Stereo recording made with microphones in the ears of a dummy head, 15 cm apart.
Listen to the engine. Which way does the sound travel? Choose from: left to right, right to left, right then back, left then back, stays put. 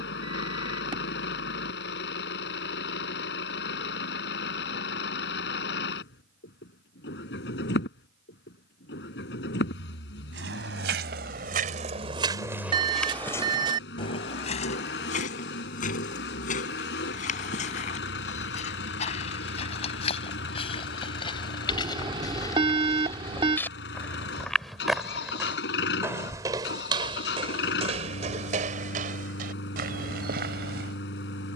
stays put.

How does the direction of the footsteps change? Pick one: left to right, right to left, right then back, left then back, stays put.
left then back.